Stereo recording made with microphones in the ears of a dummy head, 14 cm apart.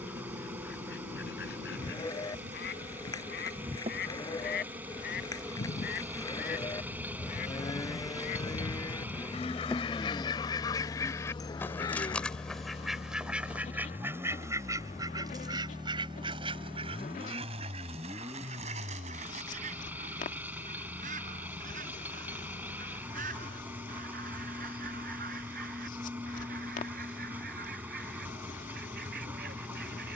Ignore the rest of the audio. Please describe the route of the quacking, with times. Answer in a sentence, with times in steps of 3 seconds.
You can hear the quacking on the left from 0 s, in the centre from 12 s and on the right from 15 s.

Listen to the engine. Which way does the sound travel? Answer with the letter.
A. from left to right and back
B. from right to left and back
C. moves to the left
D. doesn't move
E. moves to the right
D.